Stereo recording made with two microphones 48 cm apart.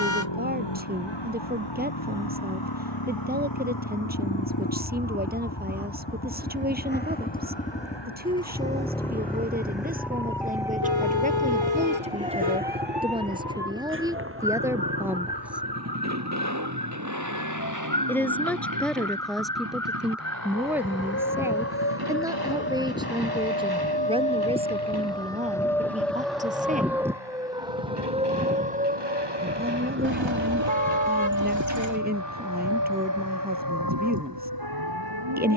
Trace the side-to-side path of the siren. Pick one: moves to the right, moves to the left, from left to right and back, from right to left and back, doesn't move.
moves to the right.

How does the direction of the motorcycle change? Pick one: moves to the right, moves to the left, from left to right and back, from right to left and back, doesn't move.
moves to the right.